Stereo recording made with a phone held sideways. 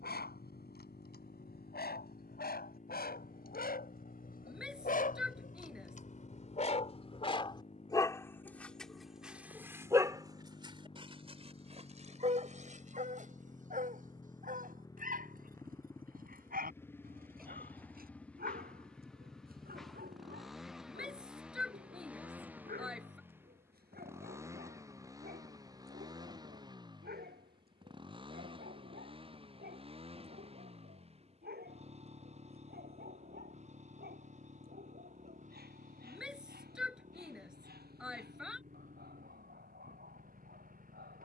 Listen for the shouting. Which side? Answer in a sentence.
In this clip you hear the shouting in the centre.